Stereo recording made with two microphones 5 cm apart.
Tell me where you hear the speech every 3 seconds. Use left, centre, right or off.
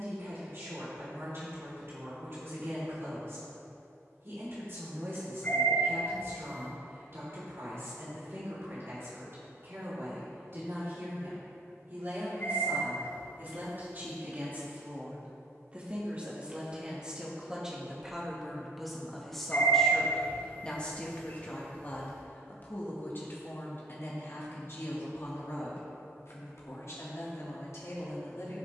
right, right, right, right, right, right, centre, left, left, left.